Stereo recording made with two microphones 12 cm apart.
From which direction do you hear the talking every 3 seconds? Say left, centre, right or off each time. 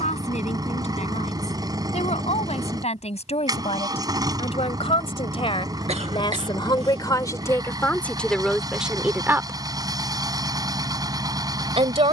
left, left, left, right.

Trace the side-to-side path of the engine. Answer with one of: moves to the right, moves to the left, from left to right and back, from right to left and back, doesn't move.
doesn't move.